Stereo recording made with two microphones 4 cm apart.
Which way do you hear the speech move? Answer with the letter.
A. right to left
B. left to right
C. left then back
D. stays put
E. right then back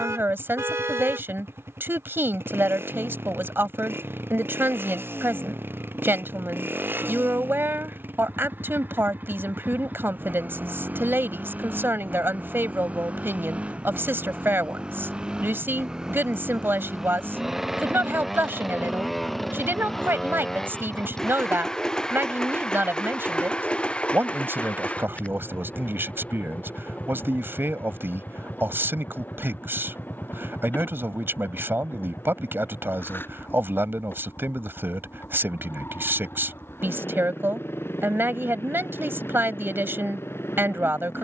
D.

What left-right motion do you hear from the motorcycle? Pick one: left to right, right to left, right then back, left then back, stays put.
right to left.